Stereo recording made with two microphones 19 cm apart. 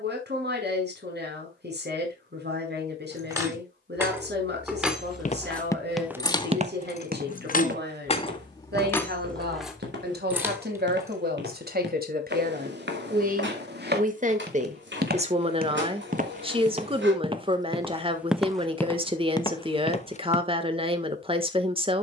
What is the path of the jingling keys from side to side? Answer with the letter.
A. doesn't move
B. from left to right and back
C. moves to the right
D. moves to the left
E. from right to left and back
E.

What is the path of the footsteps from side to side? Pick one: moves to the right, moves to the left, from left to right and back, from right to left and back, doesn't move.
from left to right and back.